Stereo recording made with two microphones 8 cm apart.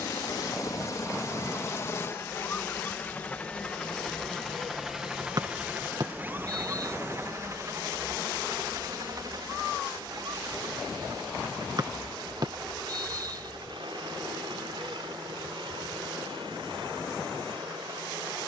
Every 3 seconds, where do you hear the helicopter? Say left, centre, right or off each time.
left, centre, right, right, right, right.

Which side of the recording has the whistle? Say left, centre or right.
right.